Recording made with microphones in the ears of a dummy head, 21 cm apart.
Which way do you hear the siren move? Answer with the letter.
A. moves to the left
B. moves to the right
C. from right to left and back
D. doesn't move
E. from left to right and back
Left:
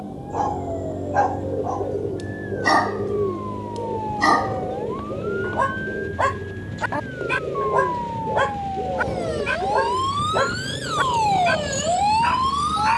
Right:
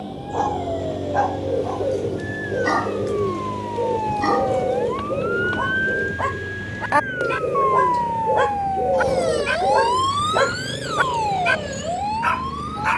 A.